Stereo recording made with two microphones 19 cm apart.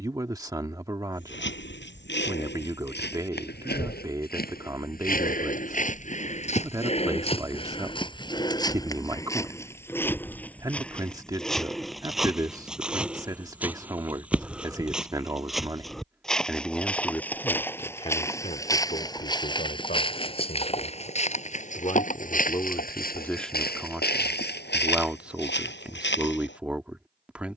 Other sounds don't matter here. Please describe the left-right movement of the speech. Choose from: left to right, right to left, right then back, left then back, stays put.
left then back.